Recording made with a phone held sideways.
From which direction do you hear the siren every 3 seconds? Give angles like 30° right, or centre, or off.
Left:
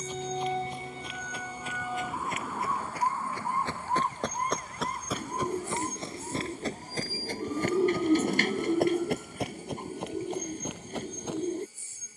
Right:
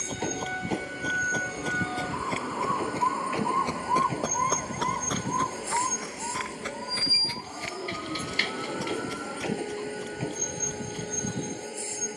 20° left, 30° right, 60° right, 70° right.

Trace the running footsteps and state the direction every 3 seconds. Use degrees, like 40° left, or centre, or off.
40° right, centre, 40° left, 70° left.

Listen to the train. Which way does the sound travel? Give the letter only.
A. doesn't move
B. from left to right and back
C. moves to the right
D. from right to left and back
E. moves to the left
A.